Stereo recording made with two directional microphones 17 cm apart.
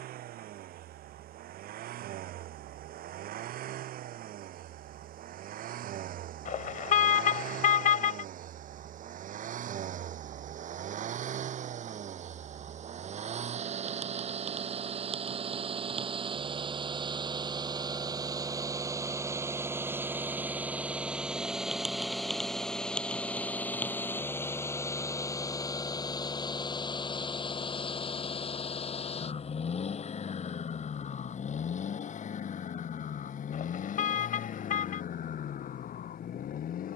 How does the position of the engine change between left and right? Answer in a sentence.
In this clip you hear the engine move from right to left.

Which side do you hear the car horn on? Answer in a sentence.
In this clip you hear the car horn on the left.